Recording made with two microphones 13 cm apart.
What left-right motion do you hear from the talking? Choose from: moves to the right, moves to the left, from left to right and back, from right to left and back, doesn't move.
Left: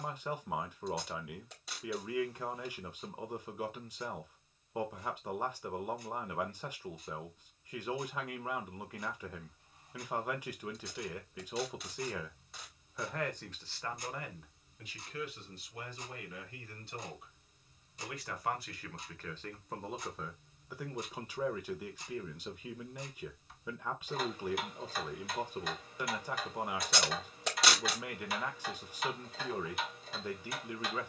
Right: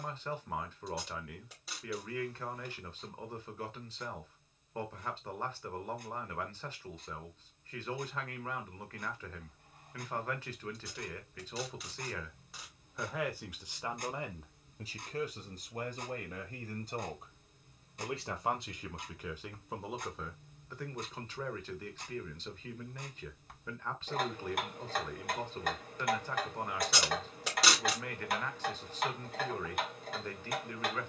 from left to right and back.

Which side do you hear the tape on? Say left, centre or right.
centre.